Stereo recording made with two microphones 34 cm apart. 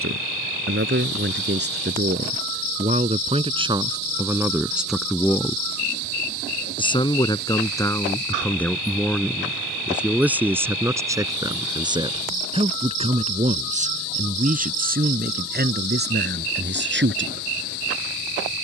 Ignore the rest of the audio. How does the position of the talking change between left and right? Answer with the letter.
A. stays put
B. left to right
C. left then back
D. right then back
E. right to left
C.